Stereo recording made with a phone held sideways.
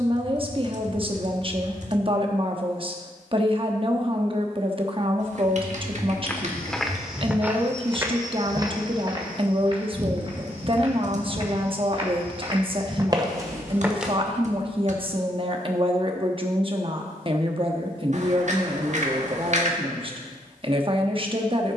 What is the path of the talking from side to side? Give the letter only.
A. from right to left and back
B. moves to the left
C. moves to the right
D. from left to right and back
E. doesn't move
E.